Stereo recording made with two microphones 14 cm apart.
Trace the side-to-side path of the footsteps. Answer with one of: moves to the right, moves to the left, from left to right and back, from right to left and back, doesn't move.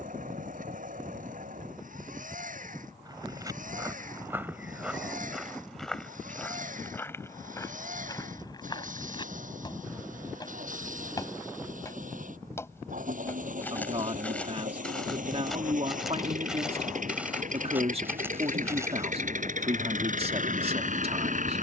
from right to left and back.